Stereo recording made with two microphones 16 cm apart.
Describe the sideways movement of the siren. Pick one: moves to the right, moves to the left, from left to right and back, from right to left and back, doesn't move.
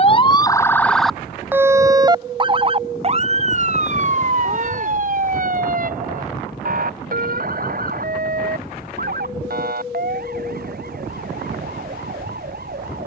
moves to the right.